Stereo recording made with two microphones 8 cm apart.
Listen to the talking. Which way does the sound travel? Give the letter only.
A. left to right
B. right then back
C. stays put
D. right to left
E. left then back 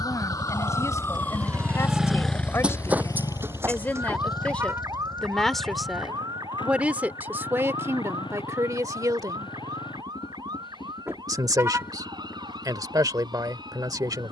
A.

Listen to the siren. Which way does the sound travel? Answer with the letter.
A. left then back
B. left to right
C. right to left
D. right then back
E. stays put
B.